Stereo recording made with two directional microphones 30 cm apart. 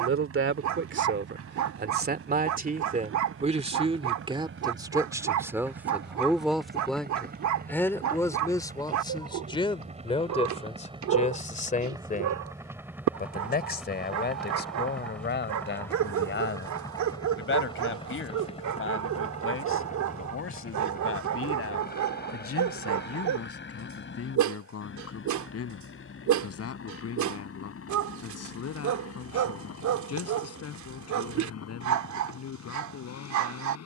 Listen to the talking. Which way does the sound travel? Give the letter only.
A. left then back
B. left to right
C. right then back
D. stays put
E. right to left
E.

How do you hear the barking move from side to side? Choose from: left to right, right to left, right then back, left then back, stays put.
stays put.